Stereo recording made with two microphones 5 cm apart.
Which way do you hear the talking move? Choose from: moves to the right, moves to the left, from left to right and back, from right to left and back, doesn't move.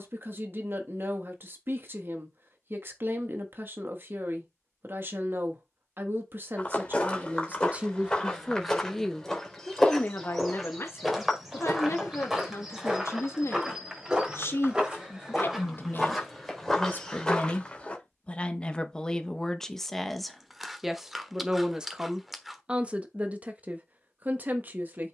from right to left and back.